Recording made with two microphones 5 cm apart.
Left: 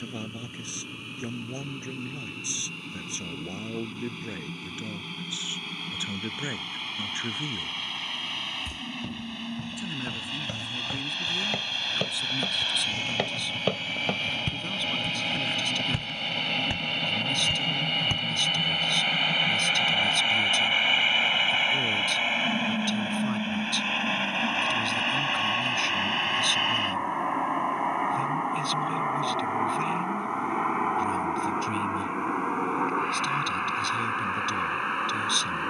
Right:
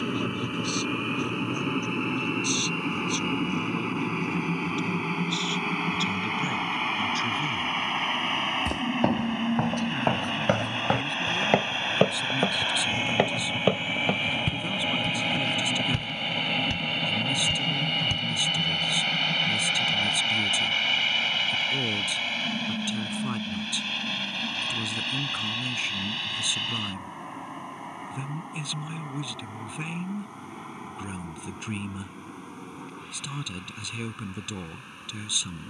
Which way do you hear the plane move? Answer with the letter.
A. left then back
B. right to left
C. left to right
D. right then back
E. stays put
B.